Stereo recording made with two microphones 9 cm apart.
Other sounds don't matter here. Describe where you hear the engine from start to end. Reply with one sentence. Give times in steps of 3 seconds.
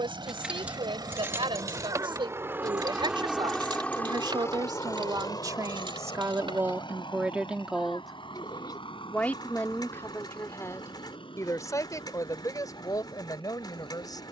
You can hear the engine on the right from 0 s and on the left from 3 s.